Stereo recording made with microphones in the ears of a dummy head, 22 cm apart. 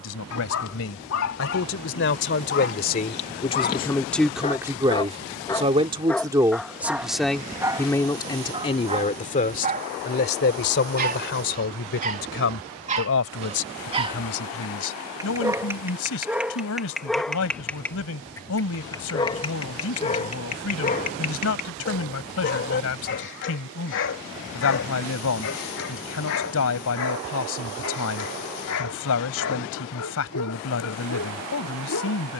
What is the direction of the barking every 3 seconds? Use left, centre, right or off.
left, left, centre, right, right, centre, left, left, left, left, left.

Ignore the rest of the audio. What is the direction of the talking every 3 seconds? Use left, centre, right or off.
left, centre, centre, left, left, left, left, left, left, left, left.